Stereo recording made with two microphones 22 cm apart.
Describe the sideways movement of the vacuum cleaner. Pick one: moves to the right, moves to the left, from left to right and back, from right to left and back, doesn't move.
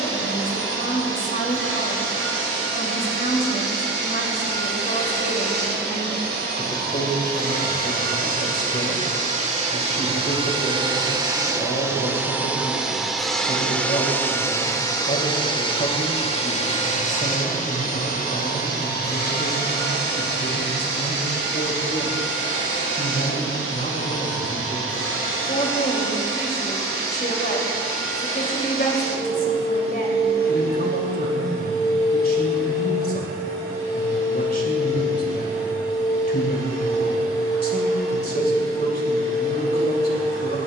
moves to the left.